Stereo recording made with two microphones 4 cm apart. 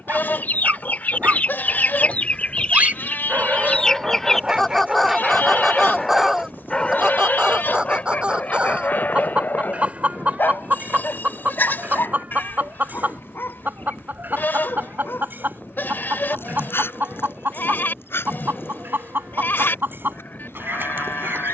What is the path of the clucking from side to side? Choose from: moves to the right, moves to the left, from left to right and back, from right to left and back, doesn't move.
moves to the right.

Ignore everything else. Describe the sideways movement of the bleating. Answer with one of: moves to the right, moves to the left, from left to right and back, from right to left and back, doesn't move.
doesn't move.